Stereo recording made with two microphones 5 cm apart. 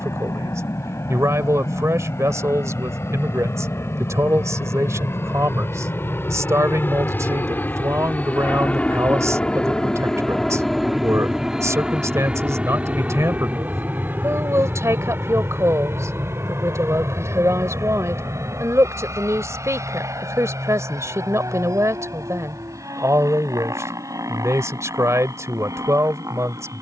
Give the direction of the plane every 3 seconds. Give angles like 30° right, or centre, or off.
70° left, 60° left, 40° left, 10° left, 30° right, 50° right, 60° right, 60° right, 70° right.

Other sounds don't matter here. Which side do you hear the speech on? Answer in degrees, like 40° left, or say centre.
60° right.